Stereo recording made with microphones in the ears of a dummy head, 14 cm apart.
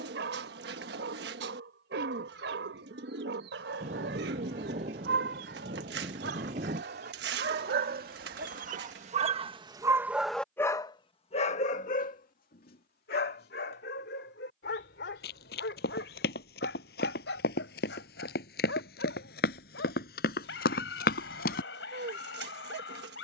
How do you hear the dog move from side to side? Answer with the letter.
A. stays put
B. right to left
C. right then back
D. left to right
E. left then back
B.